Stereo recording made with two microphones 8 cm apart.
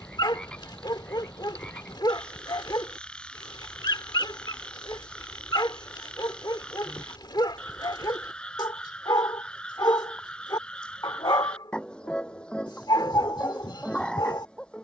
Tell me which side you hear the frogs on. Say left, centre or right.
centre.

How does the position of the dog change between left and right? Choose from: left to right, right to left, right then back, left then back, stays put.
stays put.